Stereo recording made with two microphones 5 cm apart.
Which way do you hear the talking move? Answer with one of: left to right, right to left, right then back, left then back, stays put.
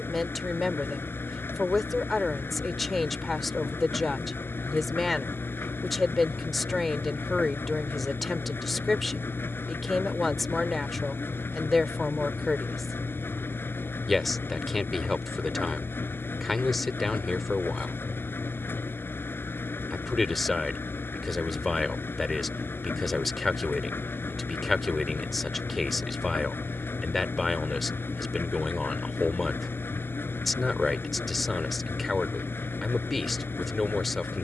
stays put.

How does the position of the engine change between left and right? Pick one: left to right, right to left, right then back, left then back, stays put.
stays put.